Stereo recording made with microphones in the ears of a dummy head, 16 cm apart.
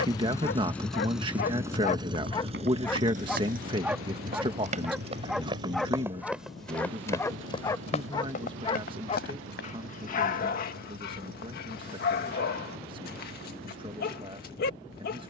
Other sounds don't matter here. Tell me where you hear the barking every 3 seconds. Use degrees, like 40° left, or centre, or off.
40° left, centre, 20° left, 50° left, 60° left.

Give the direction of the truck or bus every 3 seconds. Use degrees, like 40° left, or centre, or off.
10° right, 60° right, 70° right, 80° right, 80° right.